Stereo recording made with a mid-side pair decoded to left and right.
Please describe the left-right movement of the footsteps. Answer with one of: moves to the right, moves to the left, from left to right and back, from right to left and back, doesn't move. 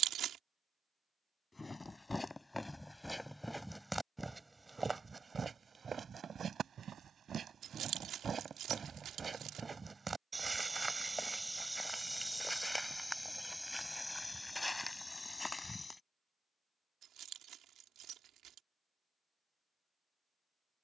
from left to right and back.